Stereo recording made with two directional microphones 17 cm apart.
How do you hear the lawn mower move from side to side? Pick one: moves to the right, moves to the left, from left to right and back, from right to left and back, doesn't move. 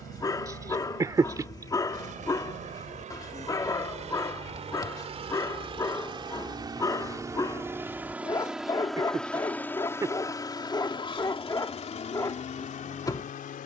moves to the left.